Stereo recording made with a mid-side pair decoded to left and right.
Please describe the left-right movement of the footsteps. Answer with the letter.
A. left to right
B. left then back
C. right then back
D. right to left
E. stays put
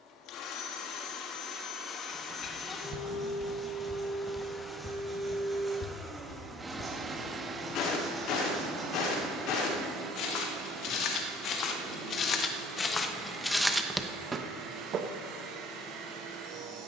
B.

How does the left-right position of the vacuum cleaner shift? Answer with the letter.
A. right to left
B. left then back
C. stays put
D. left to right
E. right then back
D.